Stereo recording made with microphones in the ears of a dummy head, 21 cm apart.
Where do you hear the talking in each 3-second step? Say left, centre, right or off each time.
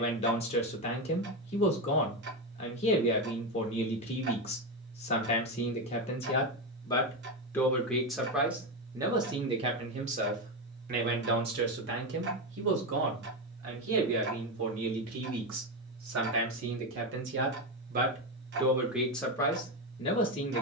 left, left, centre, right, right, right, centre.